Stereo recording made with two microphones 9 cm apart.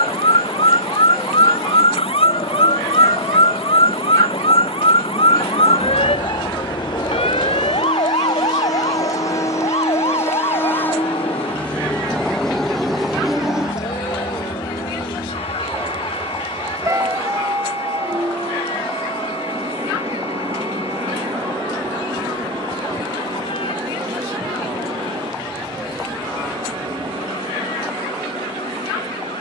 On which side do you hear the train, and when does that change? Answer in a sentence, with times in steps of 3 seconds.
In this clip you hear the train on the left from 0 s, in the centre from 12 s and on the right from 15 s.